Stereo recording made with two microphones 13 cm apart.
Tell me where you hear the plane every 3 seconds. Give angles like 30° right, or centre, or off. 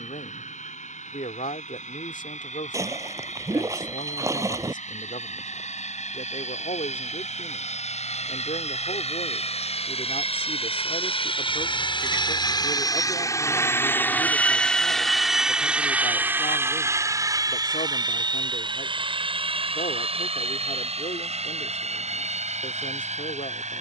80° left, 70° left, 70° left, 50° left, 20° left, 20° right, 40° right, 50° right.